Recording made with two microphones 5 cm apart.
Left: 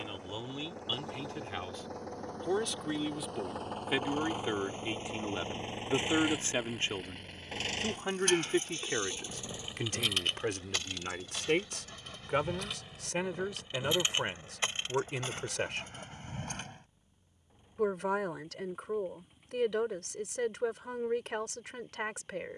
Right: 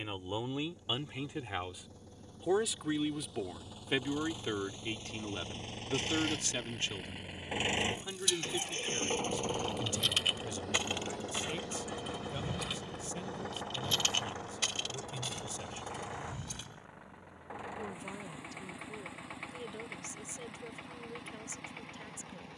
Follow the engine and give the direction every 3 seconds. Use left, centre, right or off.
left, left, centre, right, right, right, right, right.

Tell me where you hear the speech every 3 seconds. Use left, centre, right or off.
centre, centre, left, left, left, left, left, left.